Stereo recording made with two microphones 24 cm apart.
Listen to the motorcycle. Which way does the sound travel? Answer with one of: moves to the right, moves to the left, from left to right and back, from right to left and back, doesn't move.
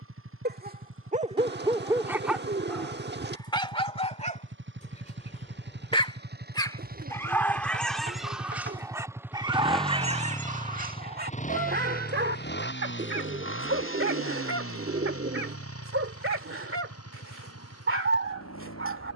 moves to the left.